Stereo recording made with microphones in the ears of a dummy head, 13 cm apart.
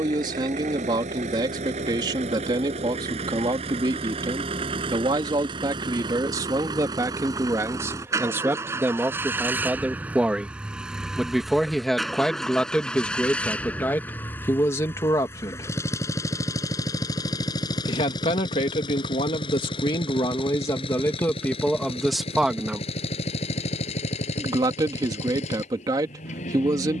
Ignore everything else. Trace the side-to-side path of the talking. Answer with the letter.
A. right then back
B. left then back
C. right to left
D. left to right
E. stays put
B.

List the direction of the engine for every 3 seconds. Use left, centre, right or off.
right, right, right, centre, centre, left, left, left, left.